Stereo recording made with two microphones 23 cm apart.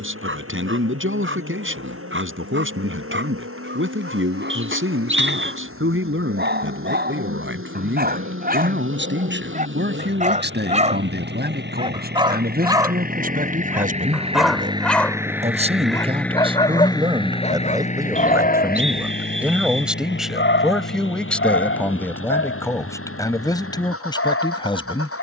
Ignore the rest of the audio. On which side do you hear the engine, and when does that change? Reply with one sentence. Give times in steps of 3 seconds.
You can hear the engine on the right from 0 s, in the centre from 15 s and on the left from 18 s.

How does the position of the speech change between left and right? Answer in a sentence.
You can hear the speech move from right to left.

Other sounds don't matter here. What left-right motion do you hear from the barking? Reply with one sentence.
You can hear the barking travel towards the left.